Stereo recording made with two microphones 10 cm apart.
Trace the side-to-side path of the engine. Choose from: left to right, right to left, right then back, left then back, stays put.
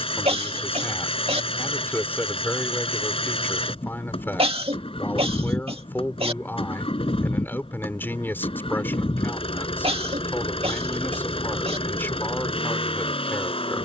stays put.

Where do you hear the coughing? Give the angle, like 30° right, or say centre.
80° right.